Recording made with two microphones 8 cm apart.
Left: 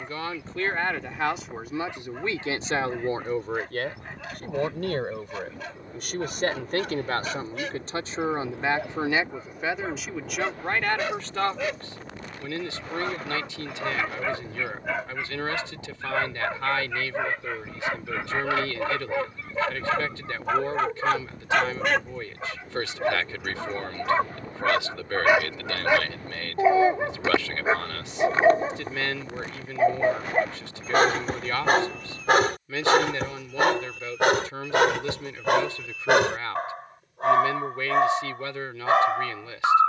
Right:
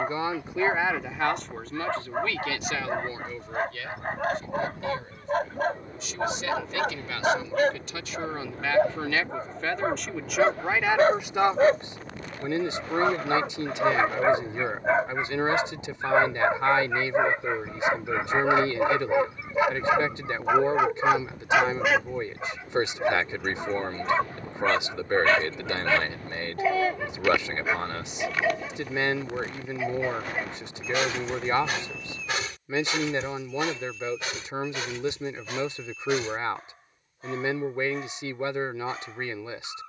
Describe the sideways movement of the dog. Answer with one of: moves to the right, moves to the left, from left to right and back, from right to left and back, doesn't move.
moves to the left.